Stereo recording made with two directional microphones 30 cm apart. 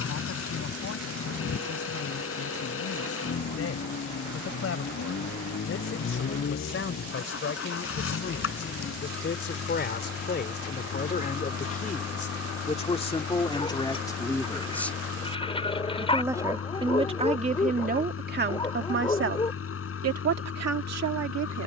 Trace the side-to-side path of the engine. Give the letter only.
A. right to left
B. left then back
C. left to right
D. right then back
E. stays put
E.